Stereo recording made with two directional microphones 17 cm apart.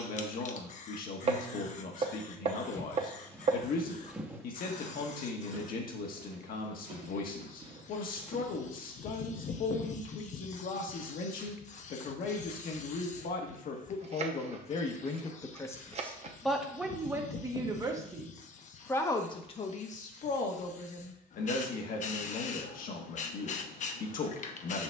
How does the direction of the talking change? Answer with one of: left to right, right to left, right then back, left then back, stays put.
right then back.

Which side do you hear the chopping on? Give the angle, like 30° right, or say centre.
40° right.